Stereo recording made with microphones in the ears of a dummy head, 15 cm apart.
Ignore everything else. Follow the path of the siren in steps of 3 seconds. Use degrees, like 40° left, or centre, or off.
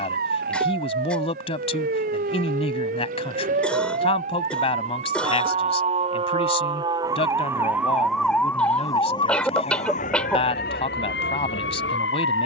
60° right, 40° right, 10° right, 50° left.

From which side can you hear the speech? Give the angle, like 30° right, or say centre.
40° left.